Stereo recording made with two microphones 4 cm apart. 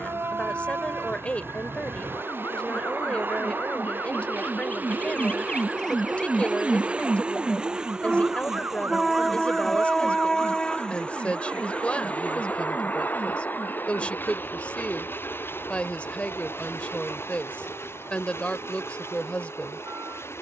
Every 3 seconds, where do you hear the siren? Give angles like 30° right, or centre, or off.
70° left, 40° left, 30° right, 60° right, 70° right, 80° right, 80° right.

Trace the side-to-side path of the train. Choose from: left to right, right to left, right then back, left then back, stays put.
right to left.